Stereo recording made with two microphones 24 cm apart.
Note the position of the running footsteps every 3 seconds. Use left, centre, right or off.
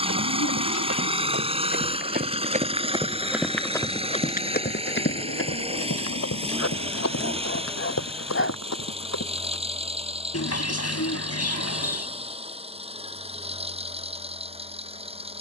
right, left, left, left, off.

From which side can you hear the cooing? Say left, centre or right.
left.